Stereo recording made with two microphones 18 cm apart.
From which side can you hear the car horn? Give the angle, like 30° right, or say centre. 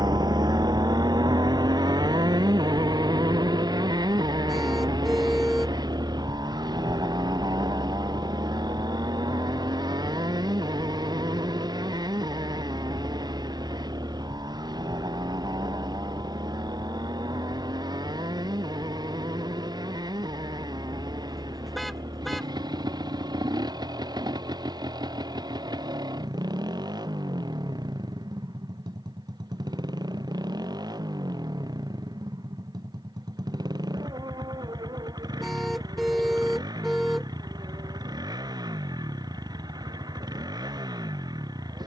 centre.